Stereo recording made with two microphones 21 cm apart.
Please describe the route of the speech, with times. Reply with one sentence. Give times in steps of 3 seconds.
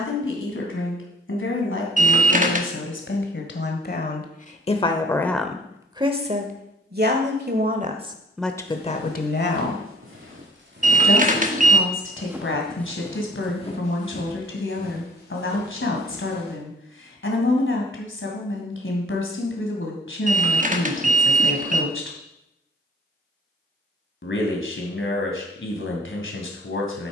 You can hear the speech on the left from 0 s, on the right from 6 s and on the left from 9 s.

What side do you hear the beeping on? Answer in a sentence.
In this clip you hear the beeping on the right.